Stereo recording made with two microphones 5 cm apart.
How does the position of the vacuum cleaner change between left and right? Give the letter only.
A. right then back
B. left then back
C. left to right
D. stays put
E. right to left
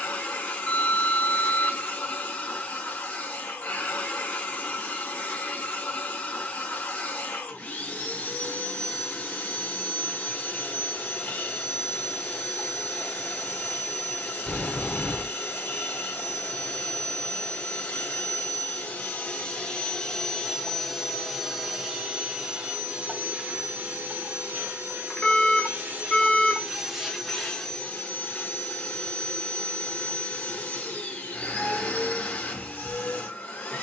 A.